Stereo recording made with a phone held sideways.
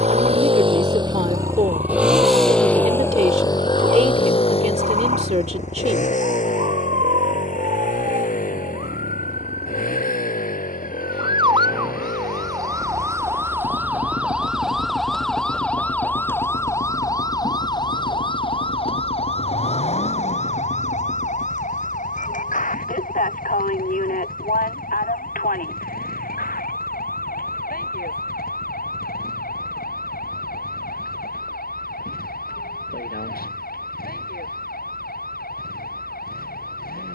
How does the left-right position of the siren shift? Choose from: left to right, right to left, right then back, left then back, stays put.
right to left.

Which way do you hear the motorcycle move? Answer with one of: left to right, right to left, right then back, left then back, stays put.
right to left.